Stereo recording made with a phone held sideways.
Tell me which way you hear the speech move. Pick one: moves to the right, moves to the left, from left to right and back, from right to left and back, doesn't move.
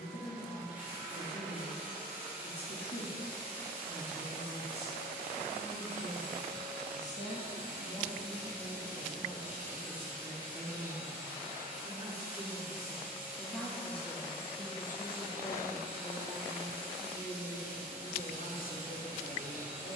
from left to right and back.